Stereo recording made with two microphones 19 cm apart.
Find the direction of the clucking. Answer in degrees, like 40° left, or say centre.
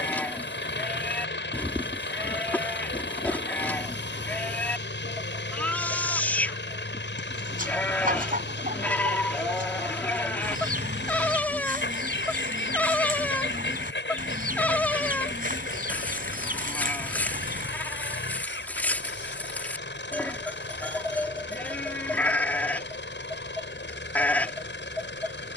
50° right.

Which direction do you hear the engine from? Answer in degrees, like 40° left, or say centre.
70° left.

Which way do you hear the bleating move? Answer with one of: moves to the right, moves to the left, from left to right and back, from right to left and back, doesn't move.
doesn't move.